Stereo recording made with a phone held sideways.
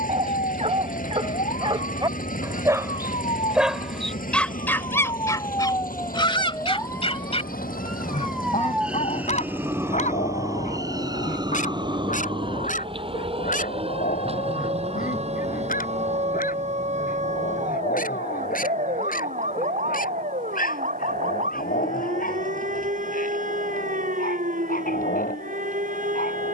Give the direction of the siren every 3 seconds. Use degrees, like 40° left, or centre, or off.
60° left, 40° left, 10° left, 20° right, 40° right, 50° right, 60° right, 60° right, 60° right.